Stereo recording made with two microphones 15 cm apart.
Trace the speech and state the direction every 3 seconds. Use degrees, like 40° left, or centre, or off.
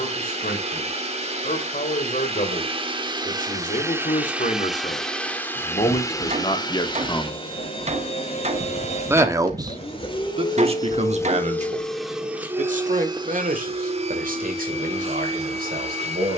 70° left, 50° left, 30° left, 40° right, 60° right, 70° right.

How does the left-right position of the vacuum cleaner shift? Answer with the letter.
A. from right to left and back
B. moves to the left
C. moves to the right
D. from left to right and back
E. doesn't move
A.